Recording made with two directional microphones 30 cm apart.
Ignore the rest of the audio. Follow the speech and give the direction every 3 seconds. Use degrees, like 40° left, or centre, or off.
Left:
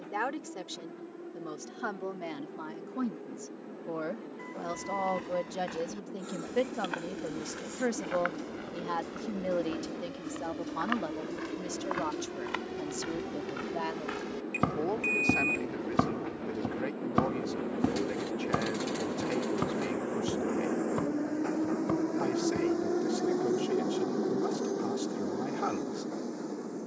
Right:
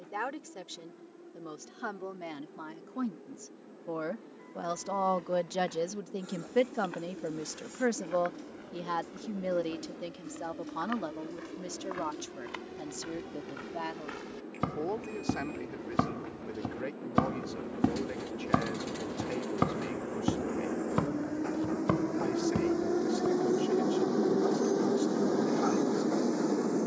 10° left, 20° right, 20° right, centre, 10° left, 10° left, 10° left, 10° left, 10° left.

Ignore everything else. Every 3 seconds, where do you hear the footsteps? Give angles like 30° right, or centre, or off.
off, 60° left, 60° left, 50° left, 30° left, centre, 40° right, 50° right, off.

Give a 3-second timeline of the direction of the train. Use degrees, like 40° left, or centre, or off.
50° left, 50° left, 50° left, 50° left, 40° left, 40° left, 30° left, centre, 40° right.